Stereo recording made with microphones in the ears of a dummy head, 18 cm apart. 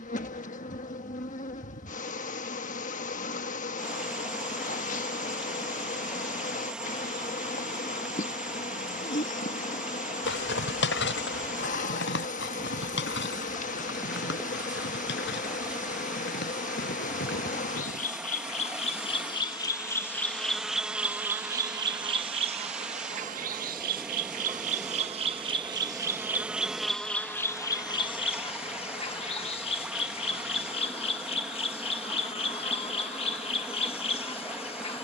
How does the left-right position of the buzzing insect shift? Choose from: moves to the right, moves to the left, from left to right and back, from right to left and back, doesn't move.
from left to right and back.